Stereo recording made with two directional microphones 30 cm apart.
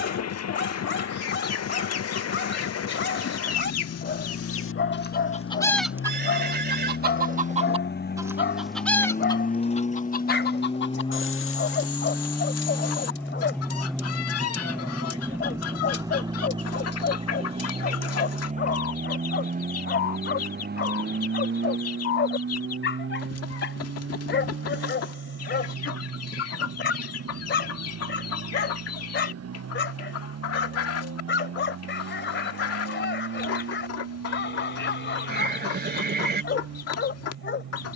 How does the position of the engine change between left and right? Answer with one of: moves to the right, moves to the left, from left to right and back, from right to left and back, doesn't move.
moves to the right.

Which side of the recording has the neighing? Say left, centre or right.
right.